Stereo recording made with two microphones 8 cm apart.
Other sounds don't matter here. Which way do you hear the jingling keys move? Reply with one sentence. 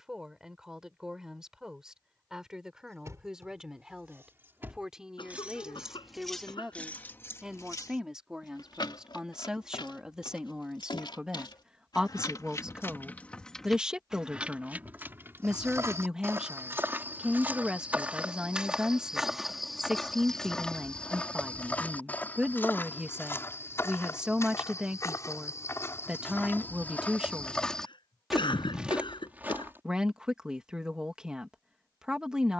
In this clip you hear the jingling keys move from right to left and back again.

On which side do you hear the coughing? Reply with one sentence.
You can hear the coughing on the left.